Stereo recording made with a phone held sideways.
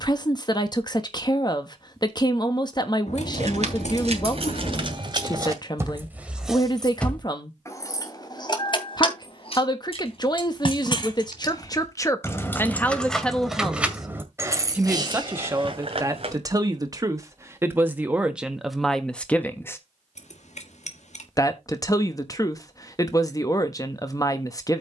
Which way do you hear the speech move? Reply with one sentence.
In this clip you hear the speech go right and come back.